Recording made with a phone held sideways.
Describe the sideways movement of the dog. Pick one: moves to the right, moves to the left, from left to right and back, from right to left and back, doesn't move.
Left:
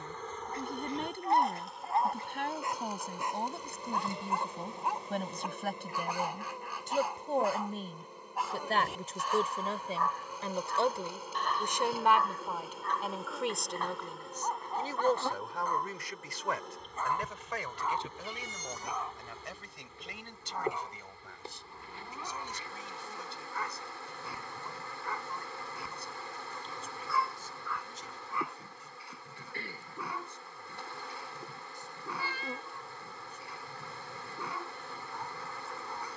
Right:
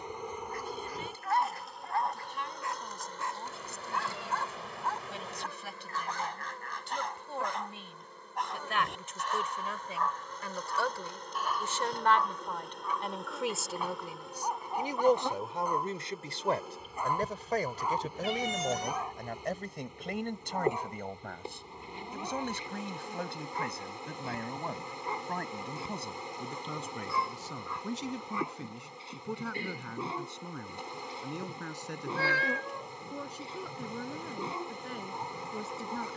moves to the right.